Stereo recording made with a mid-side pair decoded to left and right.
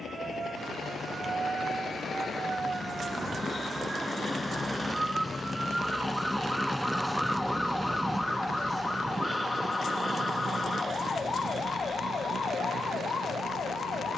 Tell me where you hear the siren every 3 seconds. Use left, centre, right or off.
right, right, centre, left, left.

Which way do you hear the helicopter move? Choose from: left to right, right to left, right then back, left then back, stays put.
left to right.